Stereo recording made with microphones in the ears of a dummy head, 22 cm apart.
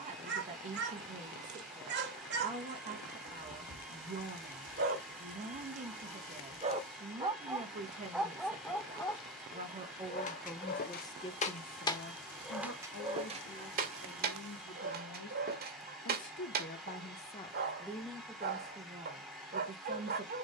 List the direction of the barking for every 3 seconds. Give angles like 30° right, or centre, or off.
50° right, 50° right, 10° right, 30° left, 30° right, 40° right, 40° right.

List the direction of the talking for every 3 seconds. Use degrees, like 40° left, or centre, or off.
30° right, 30° right, 30° right, centre, 70° left, 40° left, 20° right.